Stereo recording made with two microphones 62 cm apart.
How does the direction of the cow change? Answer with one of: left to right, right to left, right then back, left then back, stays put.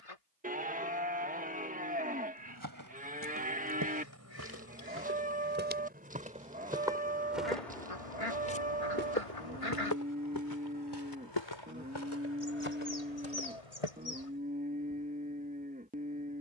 stays put.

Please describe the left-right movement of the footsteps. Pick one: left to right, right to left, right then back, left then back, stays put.
right to left.